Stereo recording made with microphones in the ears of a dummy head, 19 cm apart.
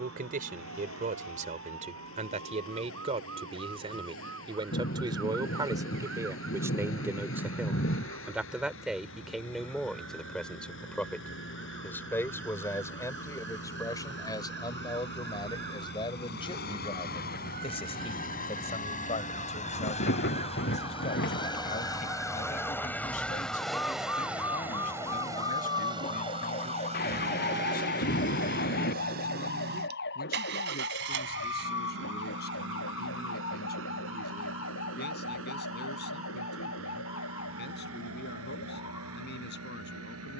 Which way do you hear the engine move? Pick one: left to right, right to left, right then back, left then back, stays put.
left to right.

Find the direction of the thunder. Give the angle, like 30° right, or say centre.
50° left.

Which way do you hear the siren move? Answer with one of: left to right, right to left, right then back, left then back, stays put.
right to left.